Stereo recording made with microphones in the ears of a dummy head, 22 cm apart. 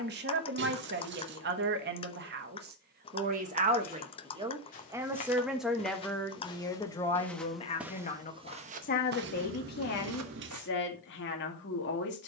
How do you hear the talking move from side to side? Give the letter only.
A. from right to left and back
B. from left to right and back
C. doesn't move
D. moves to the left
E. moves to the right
D.